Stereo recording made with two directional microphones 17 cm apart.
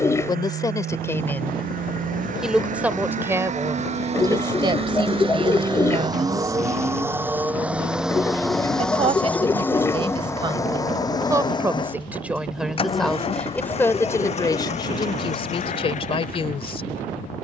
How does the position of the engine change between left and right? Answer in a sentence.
In this clip you hear the engine move from right to left.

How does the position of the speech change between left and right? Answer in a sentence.
You can hear the speech go right and come back.